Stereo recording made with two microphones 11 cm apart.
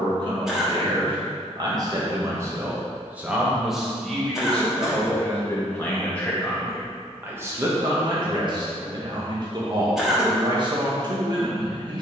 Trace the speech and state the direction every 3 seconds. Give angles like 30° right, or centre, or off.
40° right, 10° left, 20° right, 40° right.